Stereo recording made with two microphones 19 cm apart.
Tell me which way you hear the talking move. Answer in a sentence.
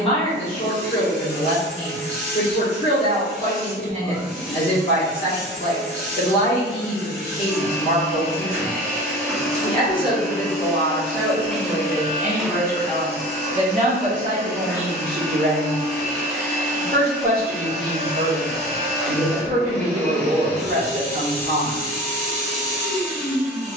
You can hear the talking move from left to right.